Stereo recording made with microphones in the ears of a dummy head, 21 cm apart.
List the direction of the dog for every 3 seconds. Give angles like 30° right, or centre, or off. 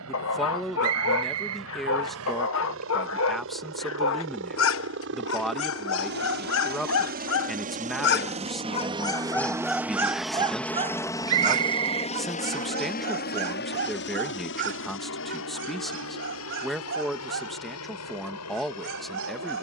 60° left, 60° left, 50° left, 10° right, 50° right, 50° right, 60° right.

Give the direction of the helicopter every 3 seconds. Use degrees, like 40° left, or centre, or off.
70° right, 60° right, 40° right, centre, 40° left, 60° left, 70° left.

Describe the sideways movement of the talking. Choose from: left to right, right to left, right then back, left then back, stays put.
stays put.